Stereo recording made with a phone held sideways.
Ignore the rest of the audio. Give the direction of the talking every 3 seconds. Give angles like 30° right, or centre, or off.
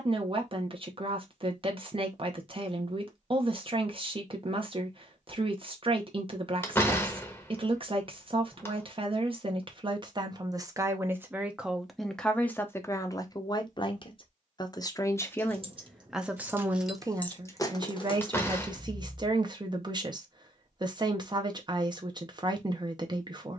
40° right, 40° right, 40° right, 30° right, 20° left, 10° right, 30° right, 30° right.